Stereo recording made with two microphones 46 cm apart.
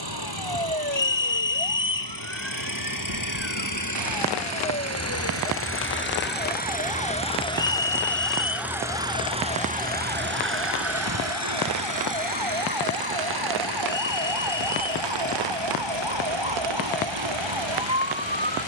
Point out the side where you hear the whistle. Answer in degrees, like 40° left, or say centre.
70° left.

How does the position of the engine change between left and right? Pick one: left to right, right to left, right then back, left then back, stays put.
left to right.